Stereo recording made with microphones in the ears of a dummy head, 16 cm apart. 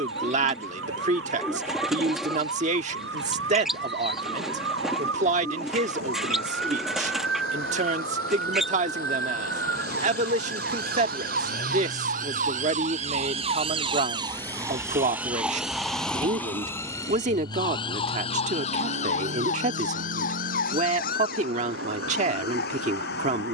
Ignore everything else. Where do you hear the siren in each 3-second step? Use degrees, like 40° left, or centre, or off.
80° right, 80° right, 70° right, 60° right, 30° right, 10° left, 40° left, 60° left.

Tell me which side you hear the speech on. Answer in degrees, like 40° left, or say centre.
40° right.